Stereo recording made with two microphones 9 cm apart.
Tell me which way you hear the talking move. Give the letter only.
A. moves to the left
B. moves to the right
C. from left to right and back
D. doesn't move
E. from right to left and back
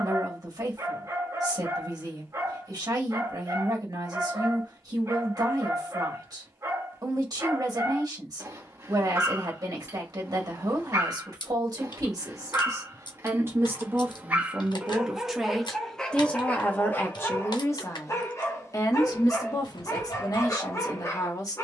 A.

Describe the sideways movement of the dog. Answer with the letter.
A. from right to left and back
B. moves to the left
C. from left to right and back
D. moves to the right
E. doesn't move
B.